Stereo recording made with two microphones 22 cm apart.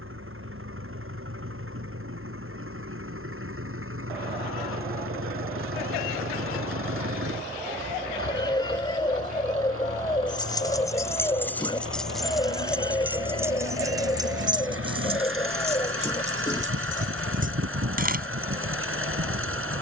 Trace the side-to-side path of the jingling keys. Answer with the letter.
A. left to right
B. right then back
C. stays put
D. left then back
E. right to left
A.